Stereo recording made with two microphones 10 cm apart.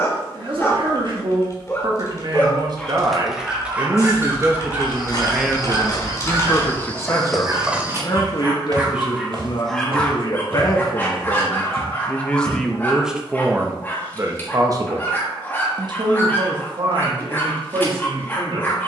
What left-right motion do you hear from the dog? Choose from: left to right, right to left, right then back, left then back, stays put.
right then back.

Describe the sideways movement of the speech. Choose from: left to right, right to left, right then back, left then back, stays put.
left then back.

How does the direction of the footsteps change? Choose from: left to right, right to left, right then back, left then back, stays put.
left to right.